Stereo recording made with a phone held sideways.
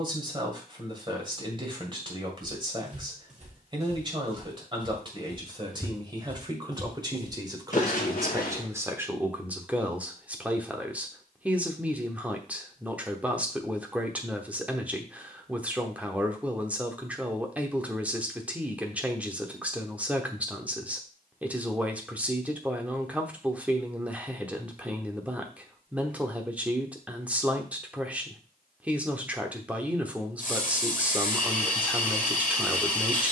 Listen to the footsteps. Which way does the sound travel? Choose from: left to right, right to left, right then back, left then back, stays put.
right to left.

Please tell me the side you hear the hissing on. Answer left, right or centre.
left.